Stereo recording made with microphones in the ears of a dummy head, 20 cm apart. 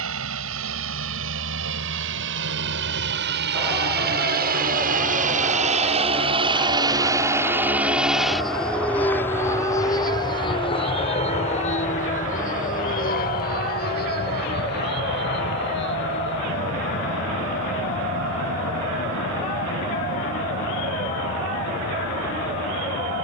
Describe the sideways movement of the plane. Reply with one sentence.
You can hear the plane go from the right side to the left.